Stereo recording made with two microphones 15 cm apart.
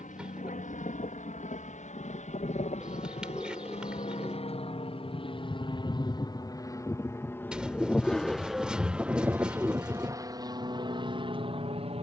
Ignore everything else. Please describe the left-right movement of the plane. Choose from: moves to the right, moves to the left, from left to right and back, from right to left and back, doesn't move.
moves to the right.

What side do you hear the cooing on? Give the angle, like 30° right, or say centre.
10° right.